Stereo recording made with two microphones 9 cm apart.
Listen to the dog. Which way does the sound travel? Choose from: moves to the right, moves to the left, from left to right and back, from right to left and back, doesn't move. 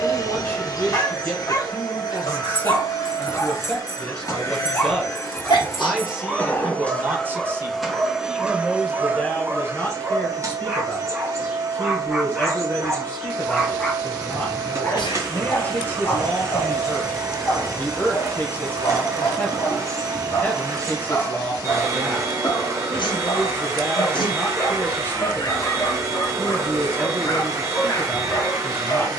from left to right and back.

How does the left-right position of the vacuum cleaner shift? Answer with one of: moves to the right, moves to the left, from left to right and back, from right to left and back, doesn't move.
moves to the right.